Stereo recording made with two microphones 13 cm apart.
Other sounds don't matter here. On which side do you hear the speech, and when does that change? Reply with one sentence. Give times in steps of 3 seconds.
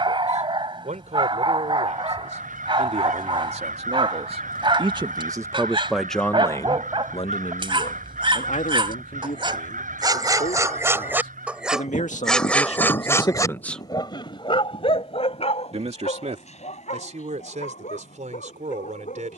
In this clip you hear the speech on the right from 0 s, on the left from 6 s and on the right from 15 s.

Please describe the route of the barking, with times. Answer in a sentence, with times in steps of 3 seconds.
You can hear the barking on the right from 0 s and on the left from 12 s.